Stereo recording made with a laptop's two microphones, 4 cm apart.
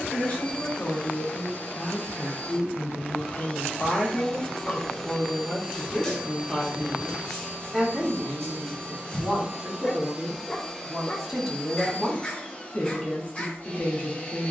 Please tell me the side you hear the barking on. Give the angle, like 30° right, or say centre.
20° left.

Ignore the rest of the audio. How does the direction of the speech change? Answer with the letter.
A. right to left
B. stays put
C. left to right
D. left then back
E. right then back
E.